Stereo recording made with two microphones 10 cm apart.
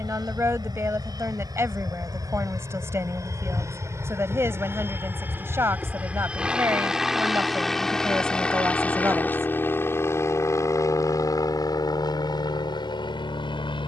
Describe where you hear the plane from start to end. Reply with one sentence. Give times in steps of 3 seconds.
You can hear the plane on the right from 0 s, in the centre from 6 s and on the left from 9 s.